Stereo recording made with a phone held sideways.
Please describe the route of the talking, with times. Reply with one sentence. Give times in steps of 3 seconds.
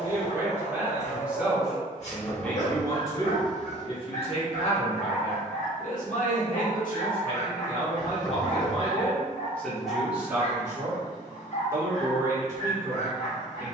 In this clip you hear the talking in the centre from 0 s, on the left from 3 s, in the centre from 9 s and on the right from 12 s.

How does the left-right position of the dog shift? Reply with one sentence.
You can hear the dog stay put.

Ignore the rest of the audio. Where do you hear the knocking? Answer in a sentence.
In this clip you hear the knocking in the centre.